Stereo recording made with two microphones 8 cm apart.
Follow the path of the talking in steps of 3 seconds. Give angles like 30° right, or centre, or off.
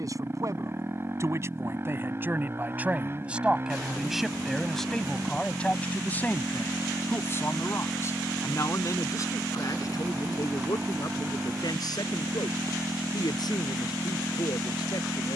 30° right, centre, 30° left, 50° left, 60° left.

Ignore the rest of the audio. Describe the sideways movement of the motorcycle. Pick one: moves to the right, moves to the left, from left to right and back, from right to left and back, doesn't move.
doesn't move.